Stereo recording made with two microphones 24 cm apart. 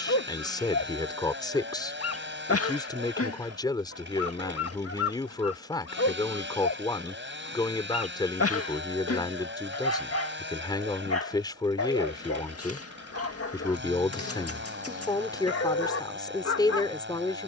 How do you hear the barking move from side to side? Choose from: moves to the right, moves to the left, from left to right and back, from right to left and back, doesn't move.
doesn't move.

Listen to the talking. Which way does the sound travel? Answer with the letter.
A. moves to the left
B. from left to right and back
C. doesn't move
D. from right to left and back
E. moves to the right
C.